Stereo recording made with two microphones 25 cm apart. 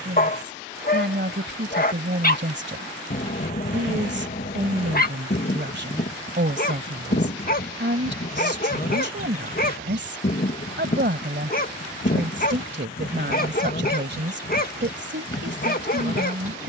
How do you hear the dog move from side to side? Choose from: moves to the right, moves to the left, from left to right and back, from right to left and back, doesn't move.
doesn't move.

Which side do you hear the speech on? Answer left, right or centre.
right.